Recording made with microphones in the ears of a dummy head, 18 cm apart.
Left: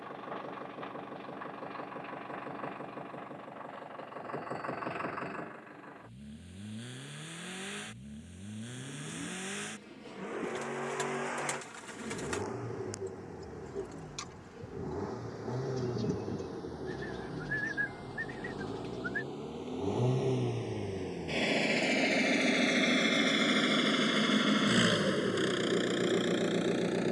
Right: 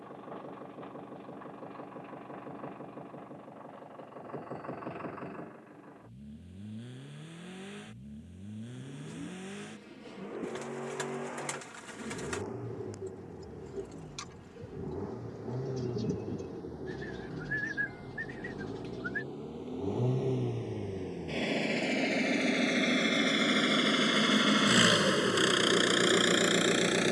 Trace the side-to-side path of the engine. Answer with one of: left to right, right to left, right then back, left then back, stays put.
left to right.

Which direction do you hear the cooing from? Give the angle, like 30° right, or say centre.
centre.